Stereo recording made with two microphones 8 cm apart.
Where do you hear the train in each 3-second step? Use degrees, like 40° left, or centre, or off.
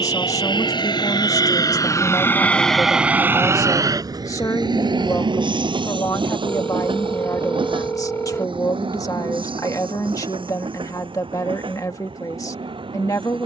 40° left, 50° right, 80° right, 80° right, 80° right.